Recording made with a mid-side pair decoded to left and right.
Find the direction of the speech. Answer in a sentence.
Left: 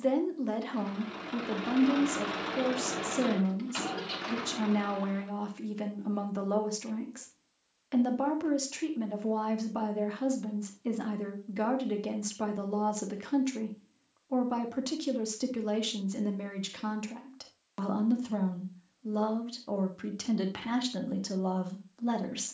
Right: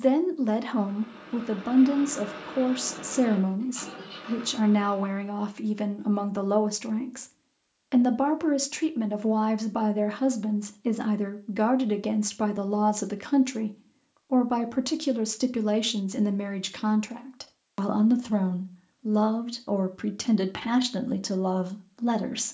In this clip you hear the speech on the right.